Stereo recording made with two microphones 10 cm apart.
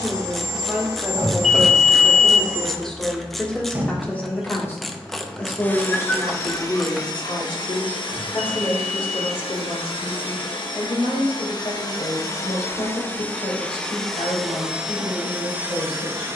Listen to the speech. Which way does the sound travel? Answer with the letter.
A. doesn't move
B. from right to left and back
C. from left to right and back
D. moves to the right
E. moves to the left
E.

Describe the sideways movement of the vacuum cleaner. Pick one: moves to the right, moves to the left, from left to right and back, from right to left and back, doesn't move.
from right to left and back.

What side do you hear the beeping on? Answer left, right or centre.
centre.